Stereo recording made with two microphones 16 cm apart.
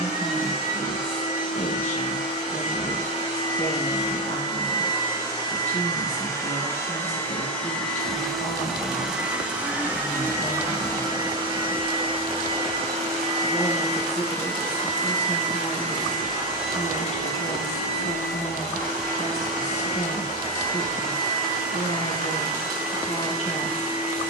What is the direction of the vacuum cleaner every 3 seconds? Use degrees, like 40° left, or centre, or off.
50° left, 30° left, 10° left, 20° right, 40° right, 60° right, 70° right, 70° right.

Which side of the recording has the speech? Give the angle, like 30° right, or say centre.
40° left.